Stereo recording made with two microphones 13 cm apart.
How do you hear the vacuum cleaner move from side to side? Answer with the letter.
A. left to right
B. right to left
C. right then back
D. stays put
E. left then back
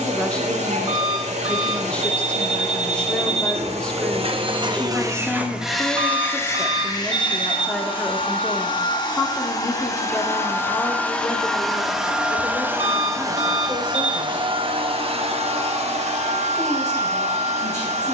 E.